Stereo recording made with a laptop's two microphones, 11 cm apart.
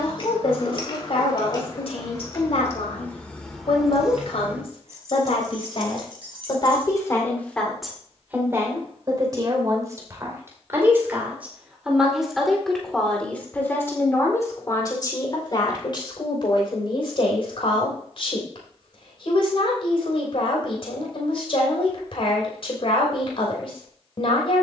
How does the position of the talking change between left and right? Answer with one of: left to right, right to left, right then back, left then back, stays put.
right then back.